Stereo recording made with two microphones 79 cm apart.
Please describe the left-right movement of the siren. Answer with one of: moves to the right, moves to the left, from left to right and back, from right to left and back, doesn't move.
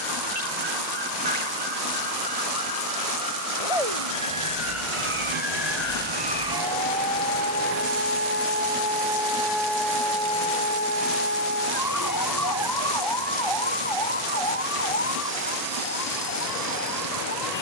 moves to the left.